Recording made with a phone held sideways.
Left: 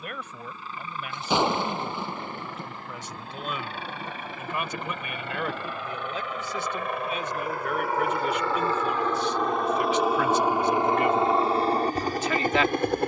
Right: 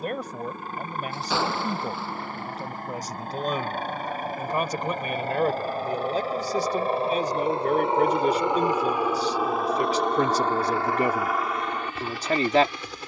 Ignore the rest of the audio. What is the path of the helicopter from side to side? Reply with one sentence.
You can hear the helicopter travel towards the left.